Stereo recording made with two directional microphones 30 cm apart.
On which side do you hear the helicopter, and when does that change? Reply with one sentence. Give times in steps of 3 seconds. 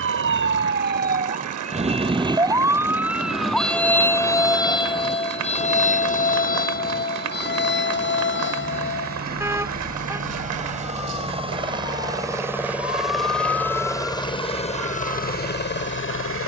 In this clip you hear the helicopter on the right from 0 s, in the centre from 12 s and on the left from 15 s.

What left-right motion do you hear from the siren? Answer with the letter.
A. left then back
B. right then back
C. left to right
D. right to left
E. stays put
D.